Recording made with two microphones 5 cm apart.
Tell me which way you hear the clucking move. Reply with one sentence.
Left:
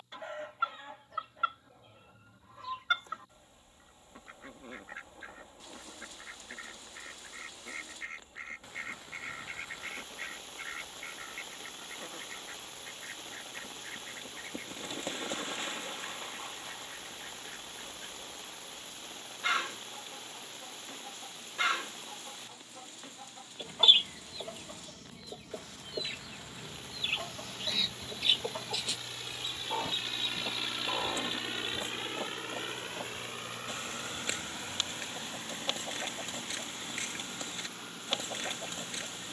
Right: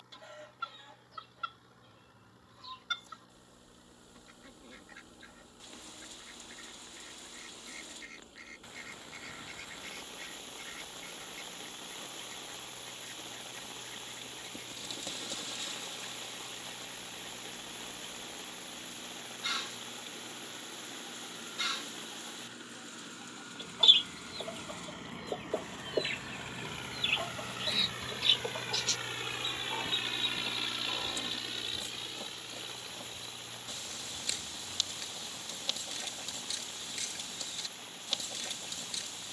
In this clip you hear the clucking go right and come back.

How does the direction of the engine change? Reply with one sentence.
In this clip you hear the engine move to the left.